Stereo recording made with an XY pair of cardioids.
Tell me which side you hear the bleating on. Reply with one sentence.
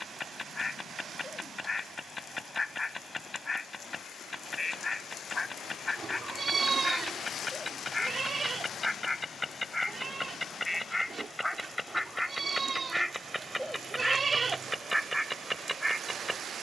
You can hear the bleating on the right.